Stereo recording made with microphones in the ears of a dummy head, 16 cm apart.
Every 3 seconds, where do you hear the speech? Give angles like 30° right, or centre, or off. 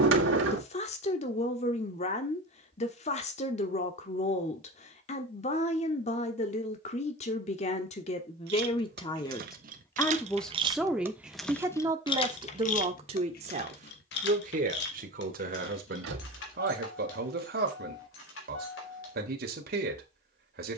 40° left, 40° left, 40° left, centre, 40° right, 60° right, 60° right.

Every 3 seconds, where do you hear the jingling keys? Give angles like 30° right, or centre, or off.
off, off, 60° right, 30° right, 50° left, 70° left, 80° left.